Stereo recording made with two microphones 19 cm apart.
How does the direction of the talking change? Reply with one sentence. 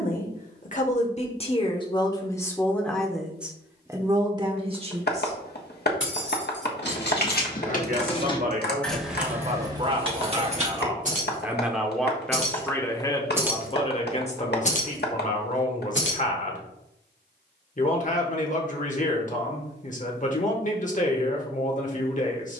You can hear the talking go right and come back.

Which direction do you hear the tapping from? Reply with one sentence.
In this clip you hear the tapping on the left.